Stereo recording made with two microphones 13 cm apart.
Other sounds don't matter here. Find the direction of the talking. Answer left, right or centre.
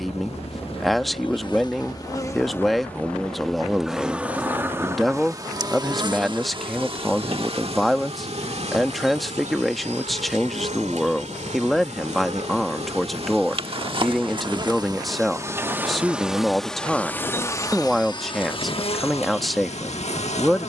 centre.